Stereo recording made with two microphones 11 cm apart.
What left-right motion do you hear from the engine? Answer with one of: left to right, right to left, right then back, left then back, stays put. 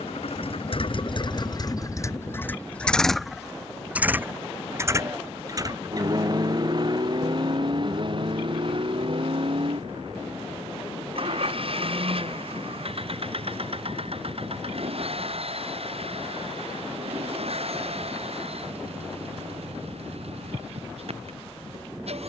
left to right.